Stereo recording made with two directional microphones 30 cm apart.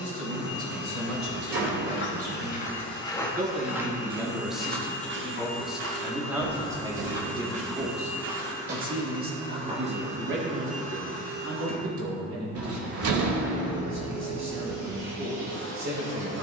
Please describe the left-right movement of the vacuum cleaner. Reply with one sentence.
You can hear the vacuum cleaner move to the right.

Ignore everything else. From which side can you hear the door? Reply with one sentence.
You can hear the door on the right.